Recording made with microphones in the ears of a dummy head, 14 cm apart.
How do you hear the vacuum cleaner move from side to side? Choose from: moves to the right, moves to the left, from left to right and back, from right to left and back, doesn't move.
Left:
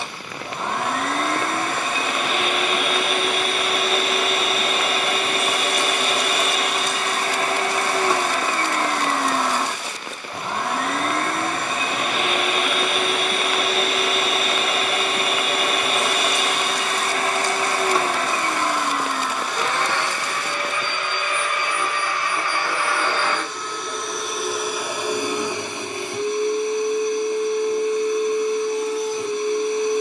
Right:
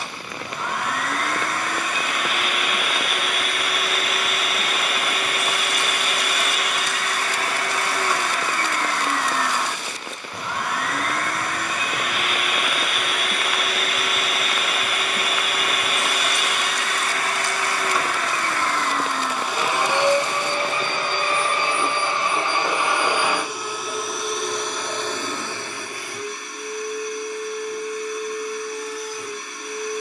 from left to right and back.